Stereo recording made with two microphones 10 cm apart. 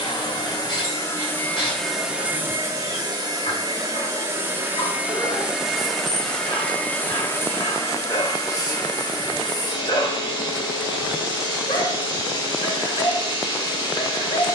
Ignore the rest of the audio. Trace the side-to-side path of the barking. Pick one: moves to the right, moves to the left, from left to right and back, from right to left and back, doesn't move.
doesn't move.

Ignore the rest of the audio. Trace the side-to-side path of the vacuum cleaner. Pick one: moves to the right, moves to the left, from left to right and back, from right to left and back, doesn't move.
from left to right and back.